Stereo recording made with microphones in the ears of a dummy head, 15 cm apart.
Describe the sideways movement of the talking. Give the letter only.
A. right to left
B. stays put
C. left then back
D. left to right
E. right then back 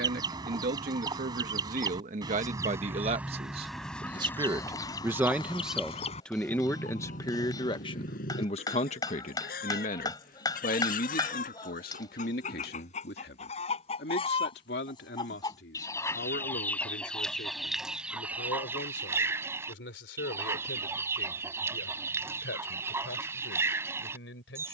A.